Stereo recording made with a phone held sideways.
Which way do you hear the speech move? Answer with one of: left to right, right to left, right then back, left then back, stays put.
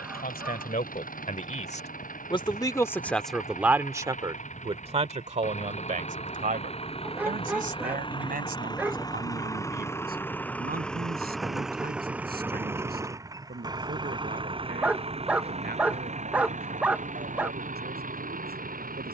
left to right.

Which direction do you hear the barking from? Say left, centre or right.
centre.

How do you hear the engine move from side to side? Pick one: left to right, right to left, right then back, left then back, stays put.
left to right.